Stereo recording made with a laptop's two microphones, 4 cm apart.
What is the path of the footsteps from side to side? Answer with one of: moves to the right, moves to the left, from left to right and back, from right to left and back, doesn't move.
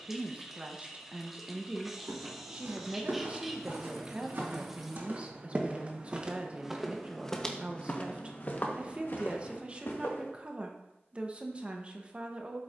moves to the left.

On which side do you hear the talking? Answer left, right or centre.
right.